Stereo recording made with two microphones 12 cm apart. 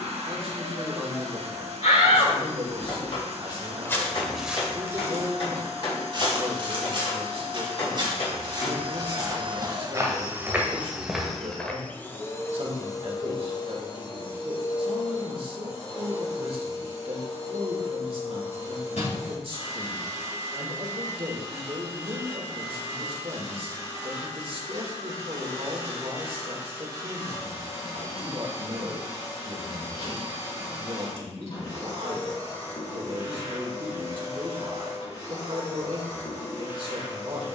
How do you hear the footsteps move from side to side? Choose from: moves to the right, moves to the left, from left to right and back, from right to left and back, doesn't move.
from left to right and back.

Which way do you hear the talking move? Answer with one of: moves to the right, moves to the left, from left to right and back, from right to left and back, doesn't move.
doesn't move.